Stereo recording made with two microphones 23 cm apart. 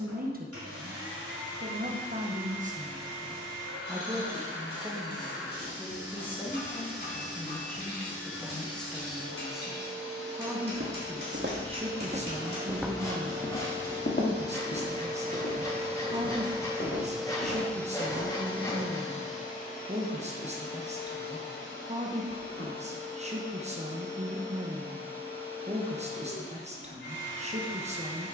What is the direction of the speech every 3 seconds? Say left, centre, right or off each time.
right, centre, centre, centre, right, right, right, right, right, right.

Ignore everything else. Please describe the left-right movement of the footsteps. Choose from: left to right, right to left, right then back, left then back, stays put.
right to left.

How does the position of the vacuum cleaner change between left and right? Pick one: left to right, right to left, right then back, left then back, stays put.
right to left.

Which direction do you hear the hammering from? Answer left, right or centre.
left.